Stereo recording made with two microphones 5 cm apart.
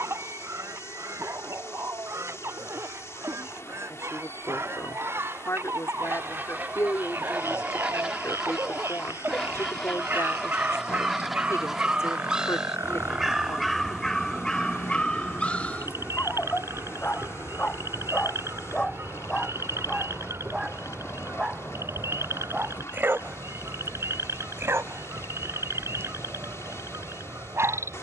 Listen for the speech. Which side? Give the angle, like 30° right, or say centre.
70° left.